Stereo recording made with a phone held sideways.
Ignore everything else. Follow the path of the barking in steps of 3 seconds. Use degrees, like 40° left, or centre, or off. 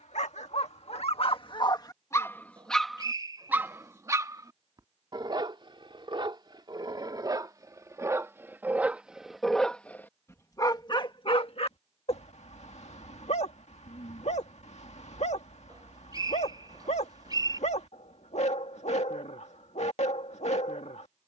40° left, 30° right, 30° right, 20° left, 60° left, 60° left, 60° left.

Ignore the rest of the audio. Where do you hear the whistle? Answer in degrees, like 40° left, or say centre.
30° right.